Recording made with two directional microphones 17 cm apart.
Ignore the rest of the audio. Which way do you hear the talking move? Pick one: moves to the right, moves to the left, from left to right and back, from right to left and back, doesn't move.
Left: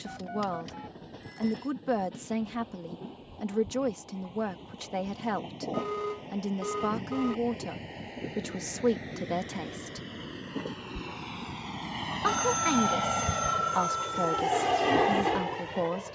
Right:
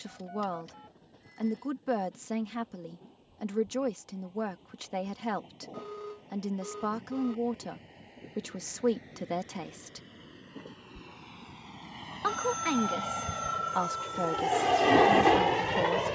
doesn't move.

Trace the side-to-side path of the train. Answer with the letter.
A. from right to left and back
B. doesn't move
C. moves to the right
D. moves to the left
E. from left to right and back
C.